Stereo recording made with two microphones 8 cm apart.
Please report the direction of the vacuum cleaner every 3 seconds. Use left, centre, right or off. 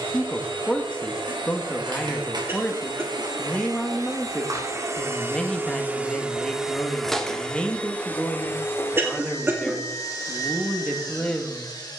right, right, centre, left.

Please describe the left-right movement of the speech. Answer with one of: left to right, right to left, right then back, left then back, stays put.
stays put.